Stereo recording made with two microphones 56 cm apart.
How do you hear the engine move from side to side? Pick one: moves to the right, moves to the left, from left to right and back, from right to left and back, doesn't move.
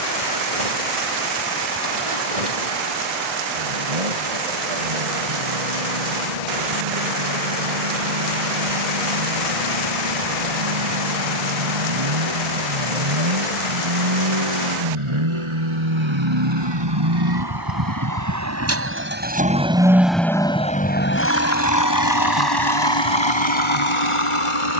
moves to the left.